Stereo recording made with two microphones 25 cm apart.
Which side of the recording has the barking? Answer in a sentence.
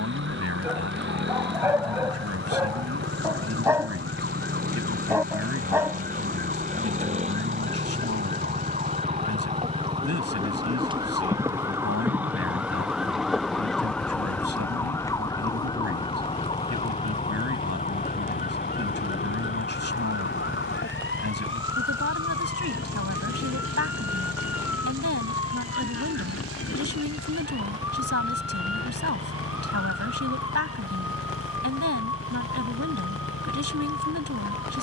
In this clip you hear the barking in the centre.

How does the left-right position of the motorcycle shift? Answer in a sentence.
In this clip you hear the motorcycle go from the right side to the left.